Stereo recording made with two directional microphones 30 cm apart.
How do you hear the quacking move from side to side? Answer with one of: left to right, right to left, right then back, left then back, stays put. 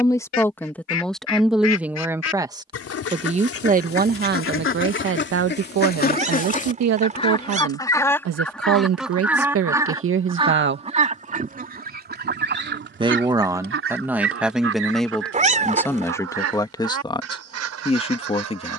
left to right.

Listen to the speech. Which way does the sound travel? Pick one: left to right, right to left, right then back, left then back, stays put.
right then back.